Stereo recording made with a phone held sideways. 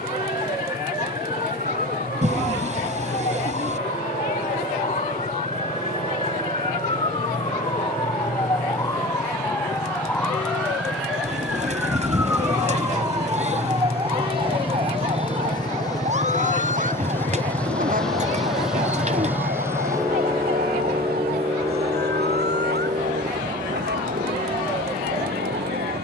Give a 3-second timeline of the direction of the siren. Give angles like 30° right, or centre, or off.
50° left, 40° left, 30° left, 10° left, 20° right, 40° right, 60° right, 70° right, 70° right.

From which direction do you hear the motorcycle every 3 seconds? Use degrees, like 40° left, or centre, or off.
60° left, 60° left, 50° left, 50° left, 30° left, 20° left, 10° right, 40° right, 60° right.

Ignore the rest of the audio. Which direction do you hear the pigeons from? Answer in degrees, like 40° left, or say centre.
40° right.